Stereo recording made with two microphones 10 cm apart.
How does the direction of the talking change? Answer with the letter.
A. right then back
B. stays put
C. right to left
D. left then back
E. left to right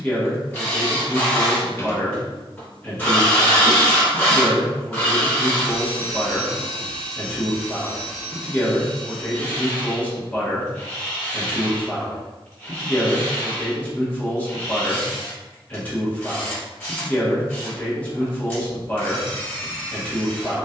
B.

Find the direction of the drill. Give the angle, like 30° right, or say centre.
20° left.